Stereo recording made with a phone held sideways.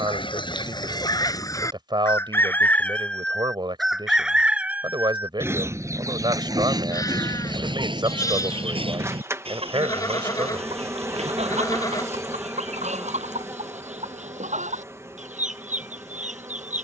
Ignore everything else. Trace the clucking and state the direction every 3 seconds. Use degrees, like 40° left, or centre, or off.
20° left, 10° right, 30° right, 50° right, 50° right, 60° right.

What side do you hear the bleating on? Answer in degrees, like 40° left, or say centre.
20° left.